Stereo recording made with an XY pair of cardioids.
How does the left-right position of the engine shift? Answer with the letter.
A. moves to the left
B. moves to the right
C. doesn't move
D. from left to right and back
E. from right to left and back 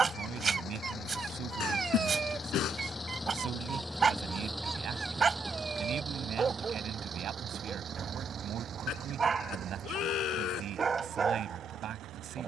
B.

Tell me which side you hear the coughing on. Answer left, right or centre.
left.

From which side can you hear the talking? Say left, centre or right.
right.